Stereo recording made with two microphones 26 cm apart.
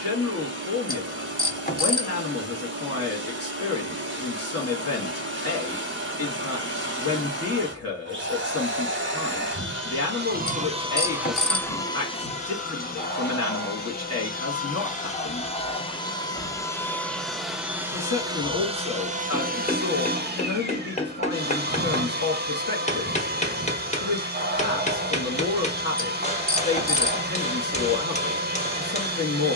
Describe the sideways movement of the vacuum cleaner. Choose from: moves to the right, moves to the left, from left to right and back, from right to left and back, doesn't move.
from right to left and back.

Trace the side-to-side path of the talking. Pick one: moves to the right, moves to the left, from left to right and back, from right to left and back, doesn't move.
doesn't move.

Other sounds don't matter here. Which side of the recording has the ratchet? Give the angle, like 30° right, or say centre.
30° left.